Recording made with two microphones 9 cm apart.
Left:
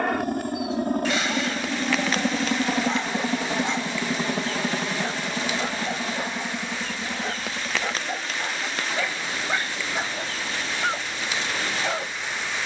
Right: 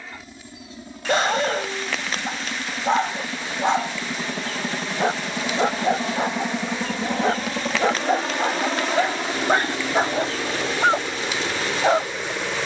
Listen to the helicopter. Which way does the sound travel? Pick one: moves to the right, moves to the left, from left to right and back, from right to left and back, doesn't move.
moves to the right.